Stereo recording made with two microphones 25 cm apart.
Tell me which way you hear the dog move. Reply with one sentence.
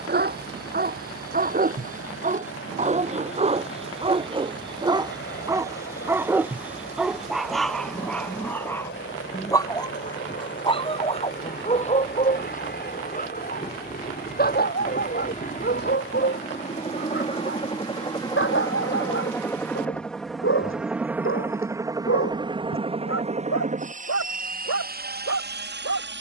In this clip you hear the dog move from right to left.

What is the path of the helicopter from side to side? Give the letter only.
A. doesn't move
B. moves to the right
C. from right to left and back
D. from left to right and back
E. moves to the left
B.